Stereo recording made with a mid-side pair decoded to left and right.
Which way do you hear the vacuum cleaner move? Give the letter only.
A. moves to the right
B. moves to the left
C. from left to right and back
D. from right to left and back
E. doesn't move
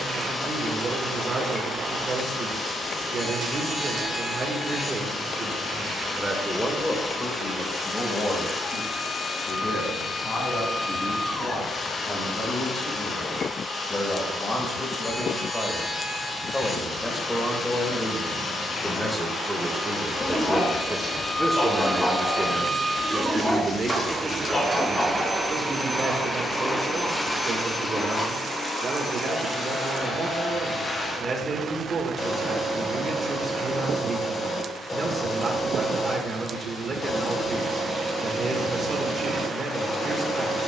C.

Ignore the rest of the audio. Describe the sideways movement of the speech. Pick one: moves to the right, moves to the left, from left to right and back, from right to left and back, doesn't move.
from right to left and back.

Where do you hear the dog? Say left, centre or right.
left.